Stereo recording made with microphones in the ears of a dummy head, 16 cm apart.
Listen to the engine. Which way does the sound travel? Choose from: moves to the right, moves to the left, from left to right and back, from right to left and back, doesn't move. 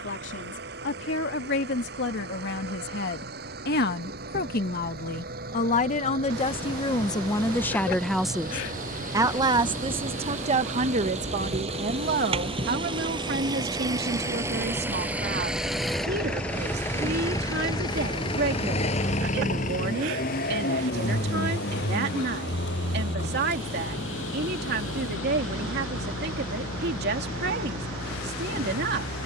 moves to the left.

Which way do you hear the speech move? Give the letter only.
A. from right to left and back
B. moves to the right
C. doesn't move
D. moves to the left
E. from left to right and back
B.